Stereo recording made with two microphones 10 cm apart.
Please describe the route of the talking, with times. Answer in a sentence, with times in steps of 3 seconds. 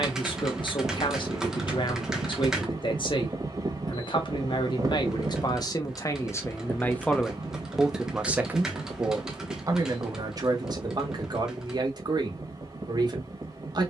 You can hear the talking on the left from 0 s, in the centre from 6 s and on the right from 9 s.